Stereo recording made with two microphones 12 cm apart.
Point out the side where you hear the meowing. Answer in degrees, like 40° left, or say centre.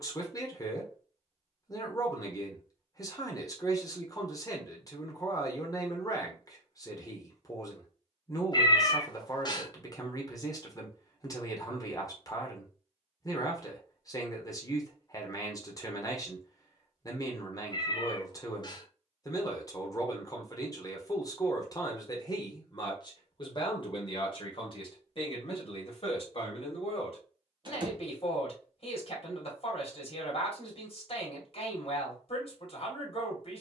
40° left.